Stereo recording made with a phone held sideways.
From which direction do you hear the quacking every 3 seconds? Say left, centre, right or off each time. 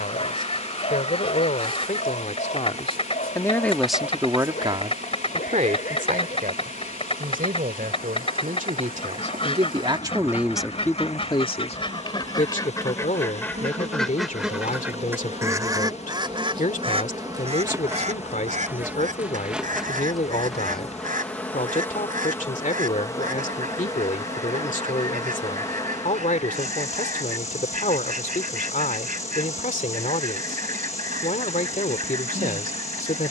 left, left, left, left, centre, right, right, right, right, right, right.